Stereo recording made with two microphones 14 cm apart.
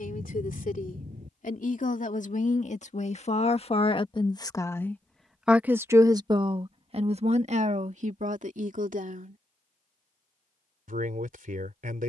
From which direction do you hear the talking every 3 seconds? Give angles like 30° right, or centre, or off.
70° left, 20° left, 50° right, 70° right.